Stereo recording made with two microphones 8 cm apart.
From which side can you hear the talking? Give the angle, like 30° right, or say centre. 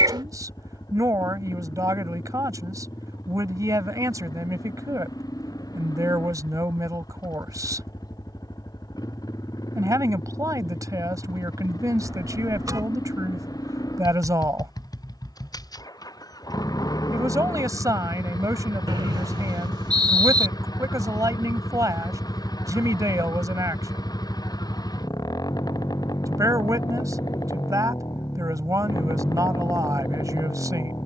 40° right.